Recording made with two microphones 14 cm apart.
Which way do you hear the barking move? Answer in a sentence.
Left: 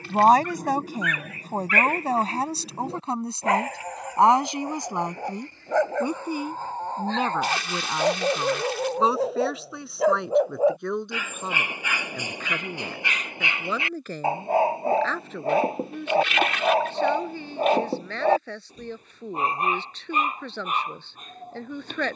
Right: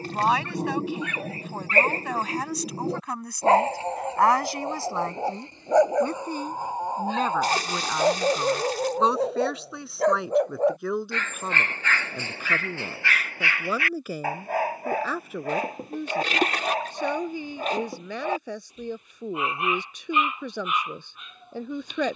In this clip you hear the barking go from the right side to the left.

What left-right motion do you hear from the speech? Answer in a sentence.
You can hear the speech move from left to right.